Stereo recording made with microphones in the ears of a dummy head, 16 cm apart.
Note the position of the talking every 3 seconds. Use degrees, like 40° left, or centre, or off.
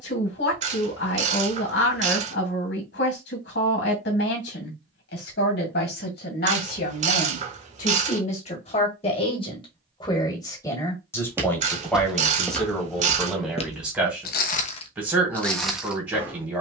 70° left, 70° left, 50° left, 20° left, centre, 10° right.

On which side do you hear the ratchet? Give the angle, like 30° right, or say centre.
40° right.